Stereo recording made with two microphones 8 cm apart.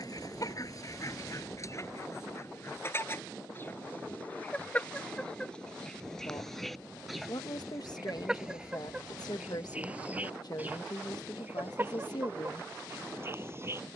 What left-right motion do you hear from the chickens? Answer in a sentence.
In this clip you hear the chickens go from the left side to the right.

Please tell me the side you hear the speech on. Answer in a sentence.
In this clip you hear the speech on the left.